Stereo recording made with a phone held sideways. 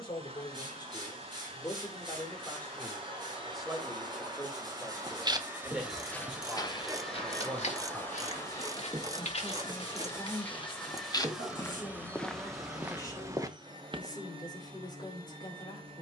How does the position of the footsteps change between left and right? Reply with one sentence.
You can hear the footsteps move from right to left and back again.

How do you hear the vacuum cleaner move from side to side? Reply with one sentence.
In this clip you hear the vacuum cleaner move from right to left and back again.